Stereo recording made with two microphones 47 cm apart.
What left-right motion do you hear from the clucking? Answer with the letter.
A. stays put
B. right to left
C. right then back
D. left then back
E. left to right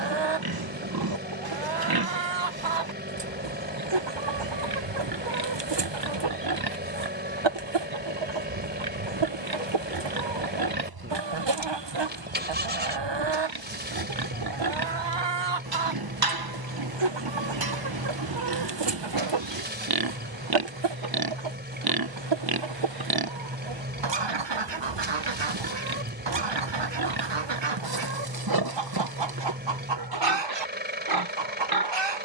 A.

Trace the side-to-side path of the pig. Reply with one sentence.
You can hear the pig stay in one place.